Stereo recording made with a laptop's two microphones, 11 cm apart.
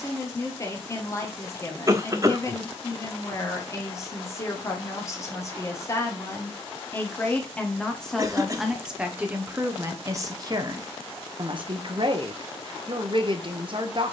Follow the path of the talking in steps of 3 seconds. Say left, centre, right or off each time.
left, left, centre, right, right.